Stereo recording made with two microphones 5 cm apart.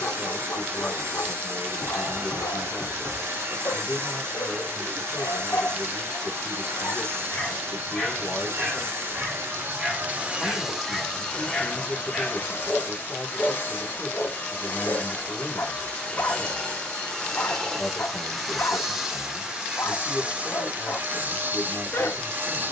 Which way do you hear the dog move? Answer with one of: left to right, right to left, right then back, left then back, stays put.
right then back.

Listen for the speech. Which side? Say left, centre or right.
left.